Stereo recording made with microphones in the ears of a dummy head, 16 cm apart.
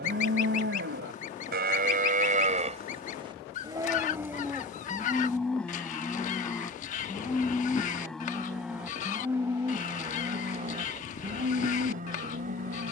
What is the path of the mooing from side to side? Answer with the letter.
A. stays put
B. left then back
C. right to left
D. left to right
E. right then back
B.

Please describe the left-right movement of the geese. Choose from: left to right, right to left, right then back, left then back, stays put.
stays put.